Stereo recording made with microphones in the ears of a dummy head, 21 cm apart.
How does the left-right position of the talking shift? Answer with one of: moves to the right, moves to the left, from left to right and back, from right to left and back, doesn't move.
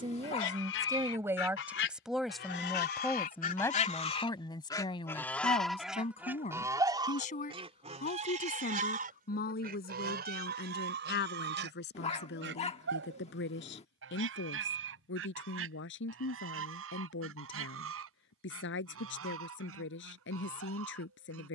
moves to the left.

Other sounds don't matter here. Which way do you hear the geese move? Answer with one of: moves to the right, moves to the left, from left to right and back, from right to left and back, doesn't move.
moves to the right.